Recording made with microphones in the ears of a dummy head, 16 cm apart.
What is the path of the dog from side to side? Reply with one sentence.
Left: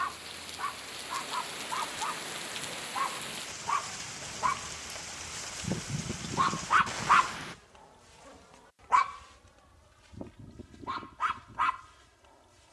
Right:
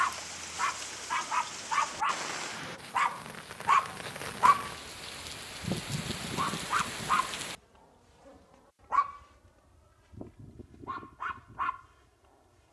You can hear the dog travel towards the left.